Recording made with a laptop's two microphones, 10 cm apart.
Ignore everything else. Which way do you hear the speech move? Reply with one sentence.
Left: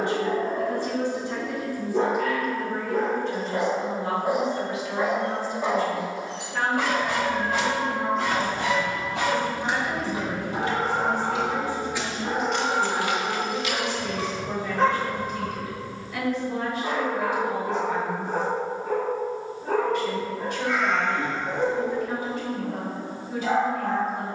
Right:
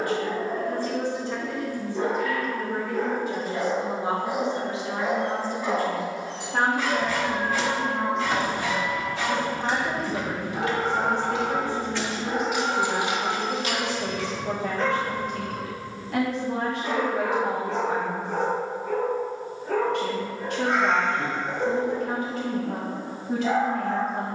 You can hear the speech move from left to right.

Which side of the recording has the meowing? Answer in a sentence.
You can hear the meowing on the right.